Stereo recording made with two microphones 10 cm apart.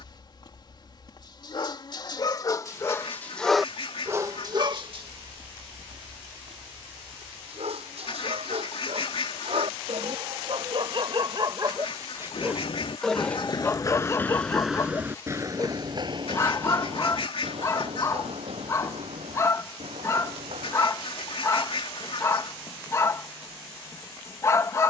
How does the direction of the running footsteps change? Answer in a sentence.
You can hear the running footsteps move to the right.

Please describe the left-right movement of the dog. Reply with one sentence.
You can hear the dog move from left to right and back again.